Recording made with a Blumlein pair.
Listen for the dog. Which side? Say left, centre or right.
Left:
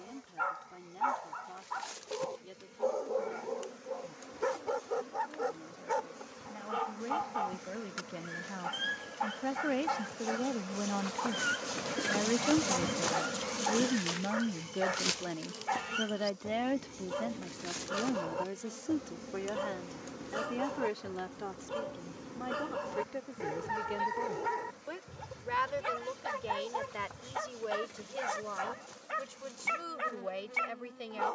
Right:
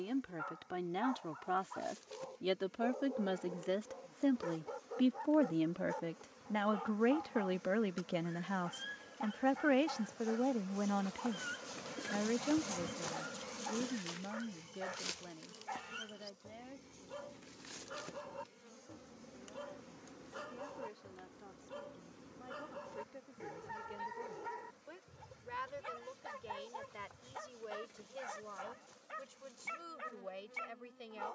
left.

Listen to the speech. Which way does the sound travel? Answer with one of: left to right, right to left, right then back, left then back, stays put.
right to left.